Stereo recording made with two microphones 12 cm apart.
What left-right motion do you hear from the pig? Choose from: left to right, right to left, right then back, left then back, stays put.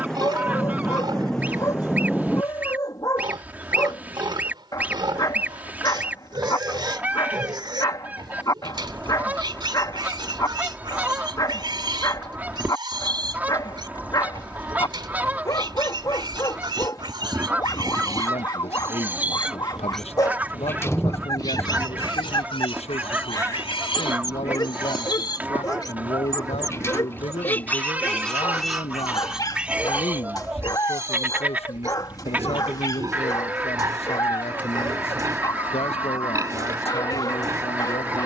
left then back.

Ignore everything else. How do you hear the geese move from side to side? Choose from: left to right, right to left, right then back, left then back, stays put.
stays put.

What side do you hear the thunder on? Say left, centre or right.
centre.